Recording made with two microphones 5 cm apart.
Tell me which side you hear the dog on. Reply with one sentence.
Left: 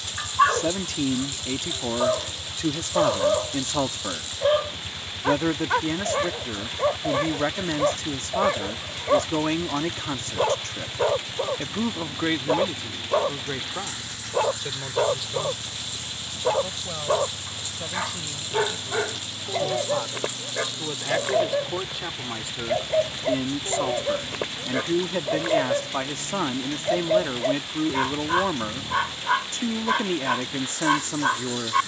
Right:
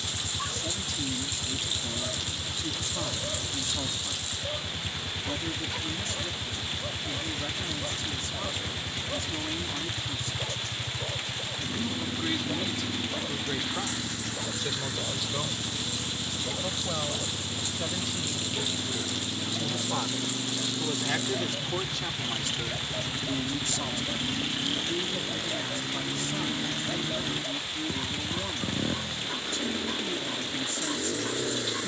You can hear the dog on the left.